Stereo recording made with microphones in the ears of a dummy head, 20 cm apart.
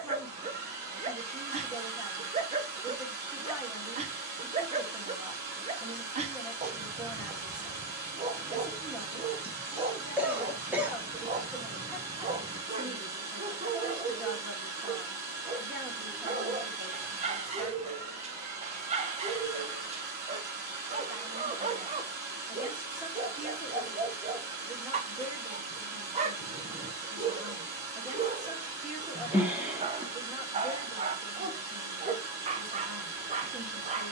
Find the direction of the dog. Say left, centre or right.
right.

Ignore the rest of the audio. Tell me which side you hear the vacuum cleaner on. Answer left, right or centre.
right.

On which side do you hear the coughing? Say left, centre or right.
centre.